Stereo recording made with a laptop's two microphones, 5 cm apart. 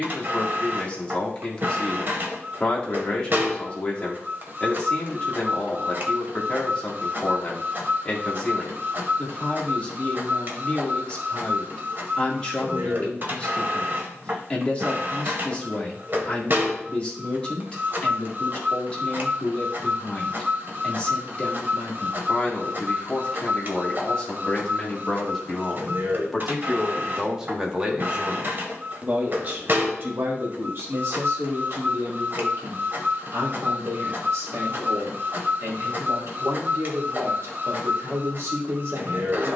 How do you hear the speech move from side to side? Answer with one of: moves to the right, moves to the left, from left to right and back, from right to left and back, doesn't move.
moves to the right.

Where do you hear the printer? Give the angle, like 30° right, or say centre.
50° right.